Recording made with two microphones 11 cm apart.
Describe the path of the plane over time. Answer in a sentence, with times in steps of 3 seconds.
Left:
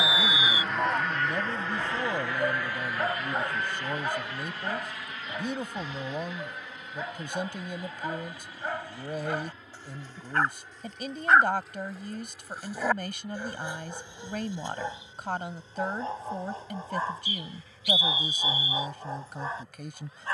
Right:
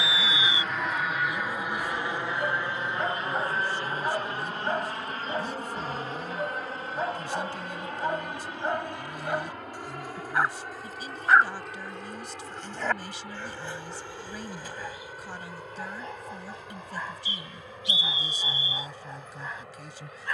In this clip you hear the plane in the centre from 0 s and on the right from 3 s.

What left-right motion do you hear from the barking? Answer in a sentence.
You can hear the barking move from left to right and back again.